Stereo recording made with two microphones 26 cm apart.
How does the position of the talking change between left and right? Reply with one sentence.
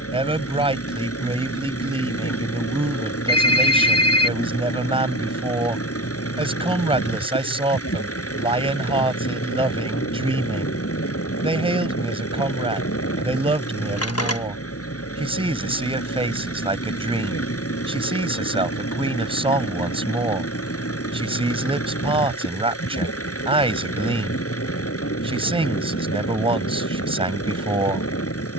In this clip you hear the talking stay put.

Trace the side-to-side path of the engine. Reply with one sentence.
In this clip you hear the engine stay put.